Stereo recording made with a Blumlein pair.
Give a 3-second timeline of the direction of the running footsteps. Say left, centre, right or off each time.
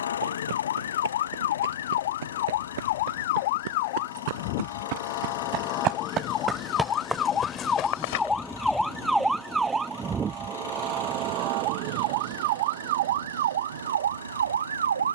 right, right, centre, off, off.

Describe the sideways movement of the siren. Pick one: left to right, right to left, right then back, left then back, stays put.
left to right.